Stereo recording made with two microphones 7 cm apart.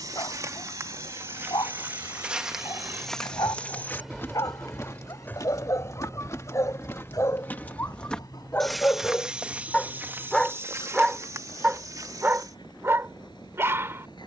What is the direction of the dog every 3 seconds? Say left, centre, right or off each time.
left, left, left, centre, right.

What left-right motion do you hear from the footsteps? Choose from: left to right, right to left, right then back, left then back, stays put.
left then back.